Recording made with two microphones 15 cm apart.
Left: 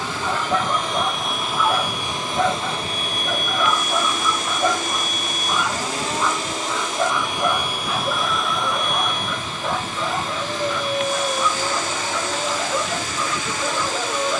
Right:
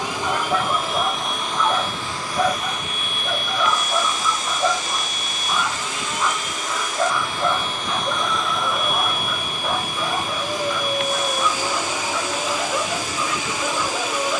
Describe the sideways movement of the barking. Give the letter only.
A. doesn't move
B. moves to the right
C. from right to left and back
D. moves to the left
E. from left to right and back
A.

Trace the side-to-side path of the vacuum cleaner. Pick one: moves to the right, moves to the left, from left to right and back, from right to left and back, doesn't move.
from right to left and back.